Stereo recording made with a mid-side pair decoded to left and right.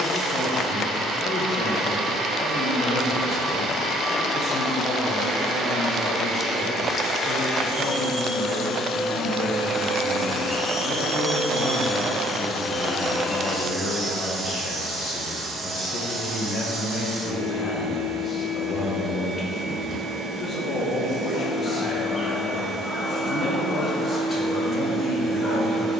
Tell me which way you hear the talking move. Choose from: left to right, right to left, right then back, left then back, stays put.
stays put.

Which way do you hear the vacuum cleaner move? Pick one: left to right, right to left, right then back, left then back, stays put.
left to right.